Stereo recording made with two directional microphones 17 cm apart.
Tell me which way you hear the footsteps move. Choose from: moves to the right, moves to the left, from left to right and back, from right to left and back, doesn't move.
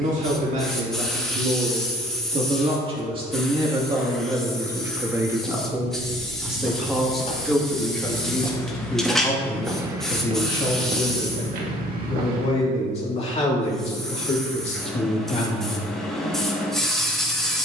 moves to the right.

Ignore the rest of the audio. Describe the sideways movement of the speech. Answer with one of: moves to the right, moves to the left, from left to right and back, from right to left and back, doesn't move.
moves to the left.